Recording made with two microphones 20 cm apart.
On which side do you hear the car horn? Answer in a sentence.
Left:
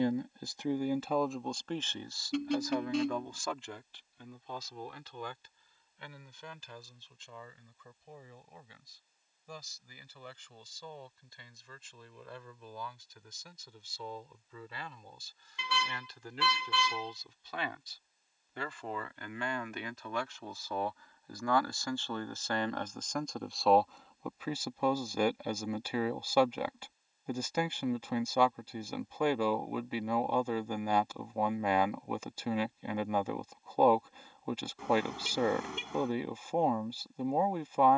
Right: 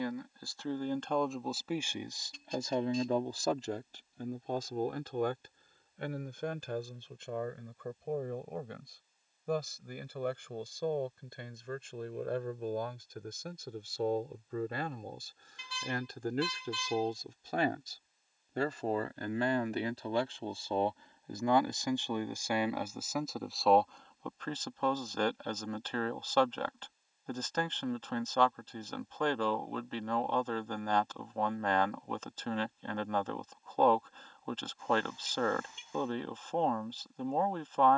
In this clip you hear the car horn on the left.